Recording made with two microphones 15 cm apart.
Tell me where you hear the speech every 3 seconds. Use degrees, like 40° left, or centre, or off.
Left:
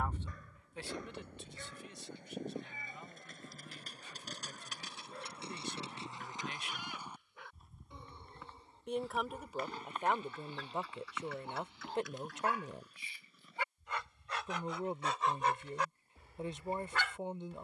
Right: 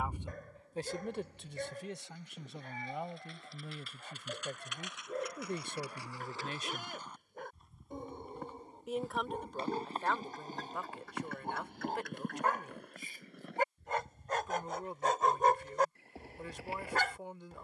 60° right, 60° right, 40° right, 20° left, 20° left, 20° left.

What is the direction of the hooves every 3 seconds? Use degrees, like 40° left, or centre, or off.
50° left, 40° left, centre, 40° right, 60° right, 80° right.